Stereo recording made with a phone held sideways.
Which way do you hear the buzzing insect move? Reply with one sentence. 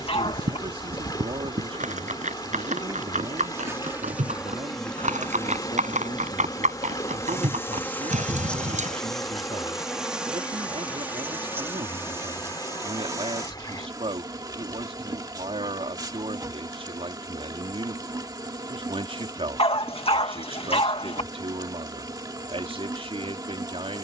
You can hear the buzzing insect move from right to left and back again.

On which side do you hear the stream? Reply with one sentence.
In this clip you hear the stream on the left.